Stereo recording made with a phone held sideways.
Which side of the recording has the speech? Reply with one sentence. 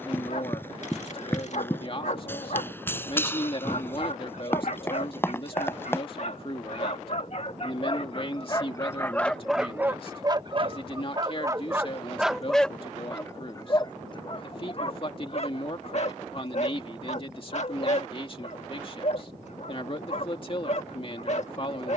In this clip you hear the speech on the left.